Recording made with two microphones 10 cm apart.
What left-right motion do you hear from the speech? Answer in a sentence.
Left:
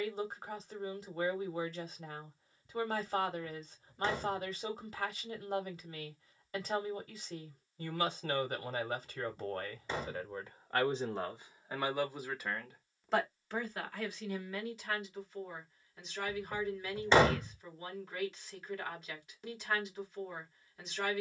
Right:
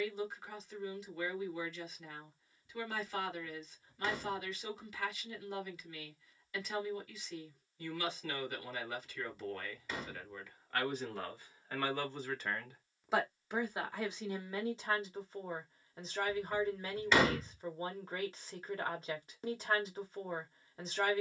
In this clip you hear the speech go from the left side to the right.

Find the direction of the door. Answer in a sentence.
You can hear the door on the left.